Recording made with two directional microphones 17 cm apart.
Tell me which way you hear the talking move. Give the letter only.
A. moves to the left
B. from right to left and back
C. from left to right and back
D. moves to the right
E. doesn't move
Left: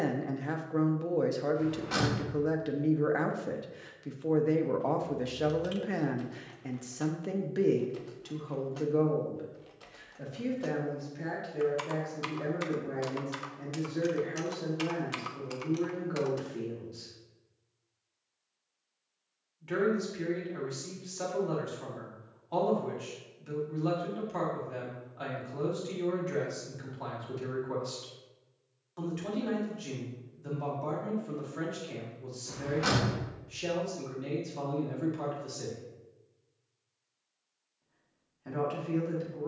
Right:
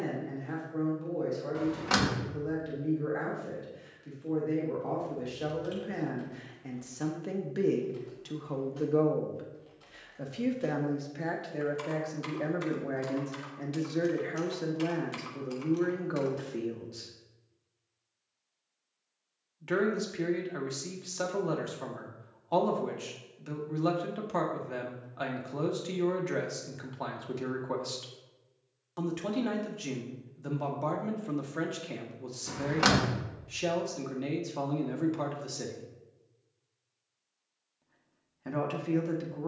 D.